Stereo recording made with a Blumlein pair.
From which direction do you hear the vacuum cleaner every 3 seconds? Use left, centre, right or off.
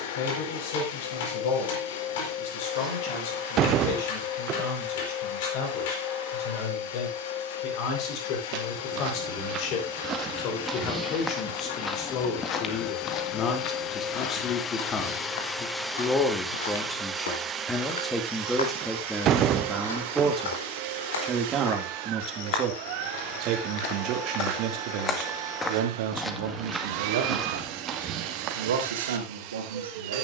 left, left, left, left, left, centre, right, right, right, right.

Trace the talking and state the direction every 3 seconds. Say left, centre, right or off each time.
left, left, left, left, left, centre, centre, right, right, right.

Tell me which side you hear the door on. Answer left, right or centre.
right.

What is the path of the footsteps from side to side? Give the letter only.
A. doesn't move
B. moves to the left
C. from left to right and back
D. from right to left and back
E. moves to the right
D.